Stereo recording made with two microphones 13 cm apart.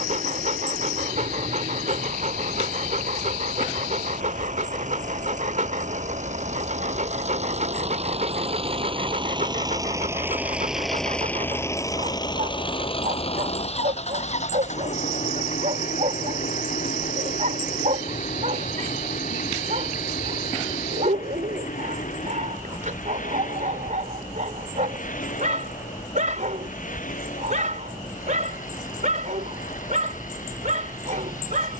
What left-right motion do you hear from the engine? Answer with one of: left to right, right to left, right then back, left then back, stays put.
right to left.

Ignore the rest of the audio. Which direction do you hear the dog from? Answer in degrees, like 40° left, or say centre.
70° right.